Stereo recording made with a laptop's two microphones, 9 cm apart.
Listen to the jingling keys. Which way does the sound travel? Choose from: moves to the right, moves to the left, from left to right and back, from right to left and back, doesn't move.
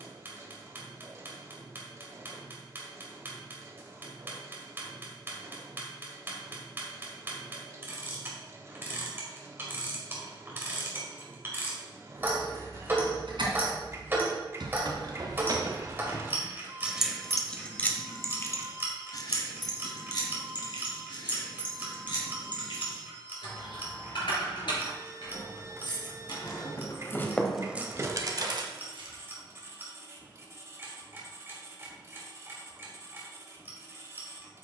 from right to left and back.